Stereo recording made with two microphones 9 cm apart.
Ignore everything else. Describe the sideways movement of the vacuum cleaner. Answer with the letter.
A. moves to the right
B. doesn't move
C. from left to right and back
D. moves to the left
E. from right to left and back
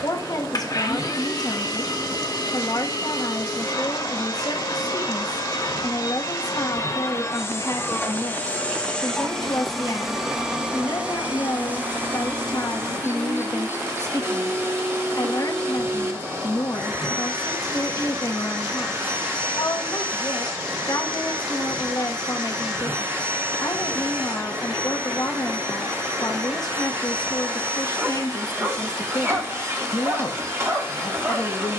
A.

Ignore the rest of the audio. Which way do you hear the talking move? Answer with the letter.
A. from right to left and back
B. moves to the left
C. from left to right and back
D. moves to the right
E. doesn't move
E.